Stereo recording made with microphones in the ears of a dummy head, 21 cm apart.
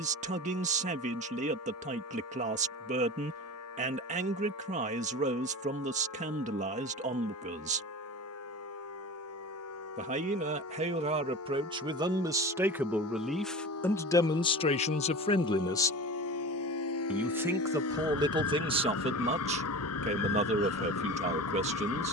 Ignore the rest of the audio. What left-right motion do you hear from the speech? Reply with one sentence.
You can hear the speech go left and come back.